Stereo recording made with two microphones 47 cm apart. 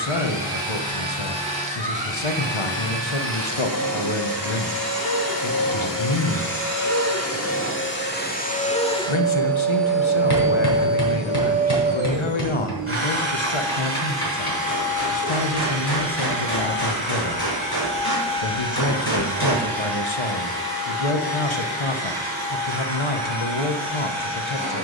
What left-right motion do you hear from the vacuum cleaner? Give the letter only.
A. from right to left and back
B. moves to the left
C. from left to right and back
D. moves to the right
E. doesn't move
D.